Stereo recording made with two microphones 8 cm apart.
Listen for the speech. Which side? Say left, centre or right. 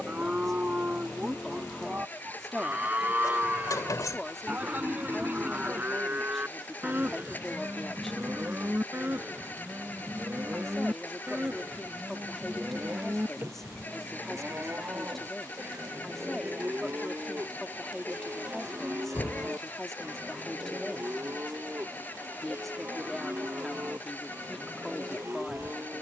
centre.